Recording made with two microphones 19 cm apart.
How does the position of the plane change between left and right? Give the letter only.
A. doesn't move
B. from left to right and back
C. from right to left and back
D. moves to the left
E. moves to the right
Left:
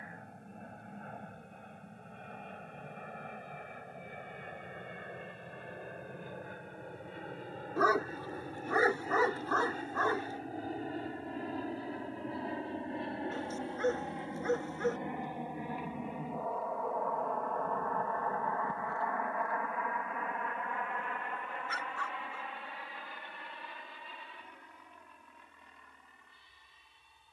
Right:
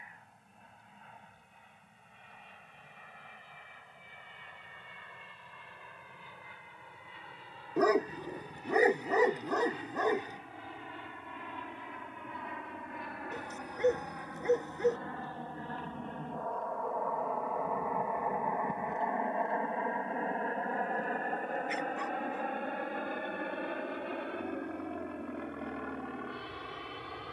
E.